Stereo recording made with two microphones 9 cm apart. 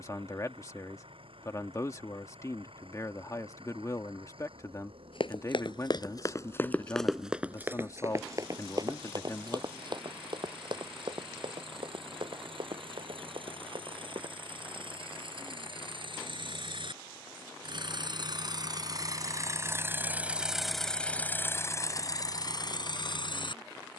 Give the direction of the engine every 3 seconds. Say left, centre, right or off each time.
right, right, right, right, right, right, right, left.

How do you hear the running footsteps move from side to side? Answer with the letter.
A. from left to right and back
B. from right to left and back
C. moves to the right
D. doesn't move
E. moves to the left
C.